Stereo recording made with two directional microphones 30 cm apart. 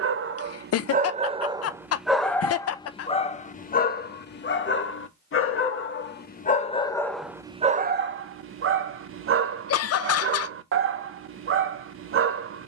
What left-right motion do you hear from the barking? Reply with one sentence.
You can hear the barking go left and come back.